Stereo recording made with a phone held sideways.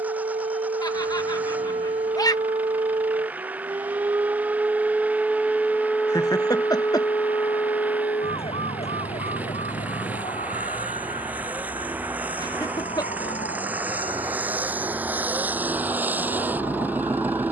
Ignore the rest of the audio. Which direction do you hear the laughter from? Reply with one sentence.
You can hear the laughter on the left.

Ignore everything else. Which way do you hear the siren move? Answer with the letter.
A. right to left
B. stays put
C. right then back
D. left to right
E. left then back
A.